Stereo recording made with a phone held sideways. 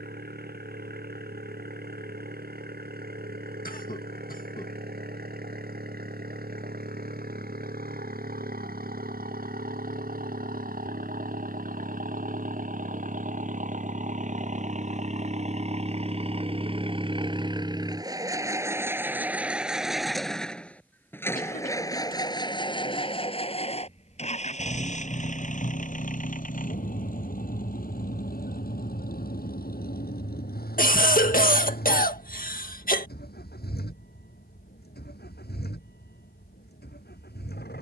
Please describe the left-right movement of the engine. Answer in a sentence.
In this clip you hear the engine go from the right side to the left.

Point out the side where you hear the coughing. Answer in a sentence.
In this clip you hear the coughing on the left.